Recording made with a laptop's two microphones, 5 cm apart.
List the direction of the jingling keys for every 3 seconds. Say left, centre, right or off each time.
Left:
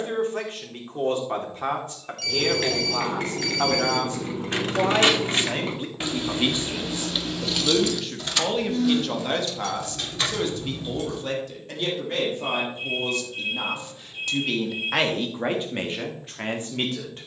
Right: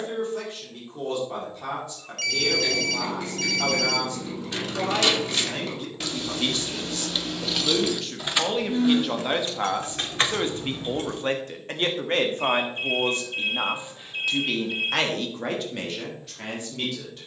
left, left, centre, right, off, off.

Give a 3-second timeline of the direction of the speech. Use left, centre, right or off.
left, left, centre, right, right, left.